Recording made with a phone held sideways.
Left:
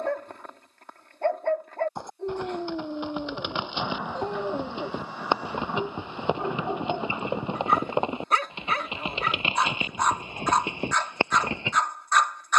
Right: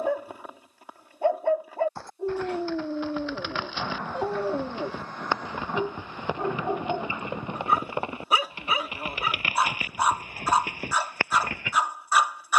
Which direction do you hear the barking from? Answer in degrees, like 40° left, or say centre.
10° right.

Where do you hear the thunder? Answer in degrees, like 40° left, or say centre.
10° left.